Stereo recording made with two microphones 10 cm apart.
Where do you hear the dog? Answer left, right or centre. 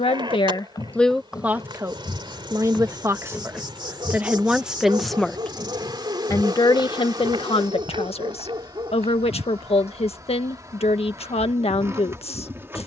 right.